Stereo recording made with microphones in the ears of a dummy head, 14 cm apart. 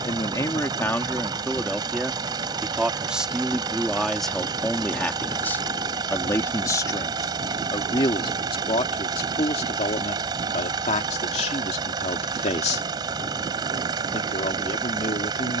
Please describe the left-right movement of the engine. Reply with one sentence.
You can hear the engine stay in one place.